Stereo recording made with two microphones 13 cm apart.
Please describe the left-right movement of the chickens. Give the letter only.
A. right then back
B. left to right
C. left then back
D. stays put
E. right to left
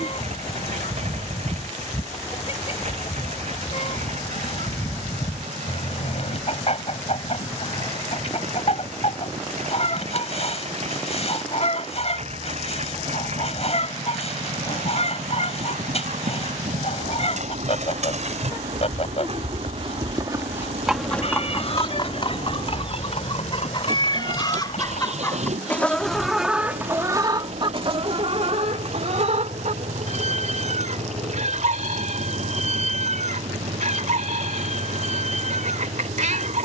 B.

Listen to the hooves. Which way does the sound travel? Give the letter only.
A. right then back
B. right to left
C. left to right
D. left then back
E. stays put
B.